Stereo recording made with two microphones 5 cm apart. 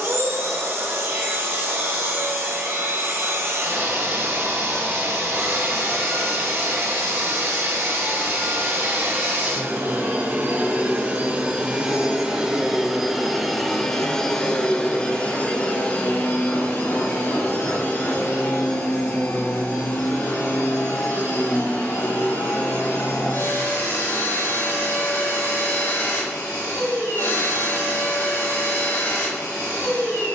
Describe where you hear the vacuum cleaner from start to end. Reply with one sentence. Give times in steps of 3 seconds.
You can hear the vacuum cleaner on the right from 0 s, in the centre from 12 s and on the left from 15 s.